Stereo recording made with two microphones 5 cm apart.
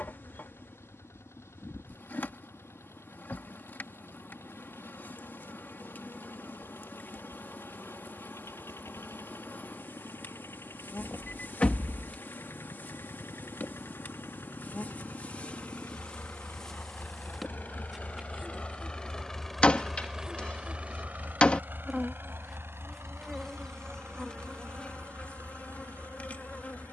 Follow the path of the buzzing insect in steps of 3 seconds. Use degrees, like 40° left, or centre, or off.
50° left, 50° left, 50° left, 50° left, 40° left, 10° left, 20° right, centre, 30° left.